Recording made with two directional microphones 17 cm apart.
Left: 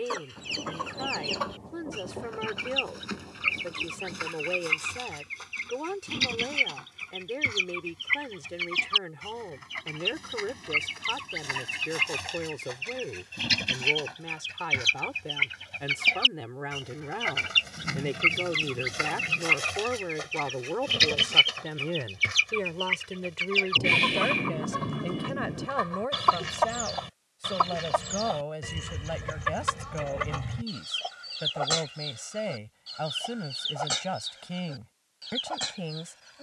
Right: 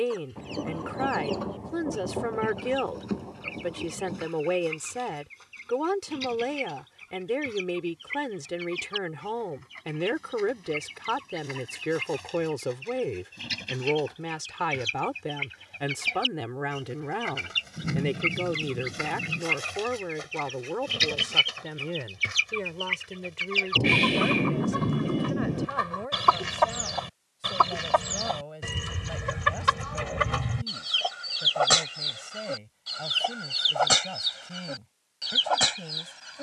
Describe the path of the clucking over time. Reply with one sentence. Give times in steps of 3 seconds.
You can hear the clucking on the left from 0 s, in the centre from 21 s and on the right from 27 s.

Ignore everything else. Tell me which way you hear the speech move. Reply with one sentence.
In this clip you hear the speech move from right to left.